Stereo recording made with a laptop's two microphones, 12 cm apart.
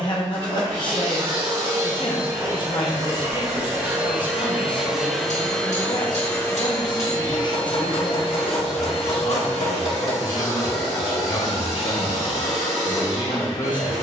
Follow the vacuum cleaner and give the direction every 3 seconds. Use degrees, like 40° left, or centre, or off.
40° right, 10° right, 40° left, 70° left, 70° left.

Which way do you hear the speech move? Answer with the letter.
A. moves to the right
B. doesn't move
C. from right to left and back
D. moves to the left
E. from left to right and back
B.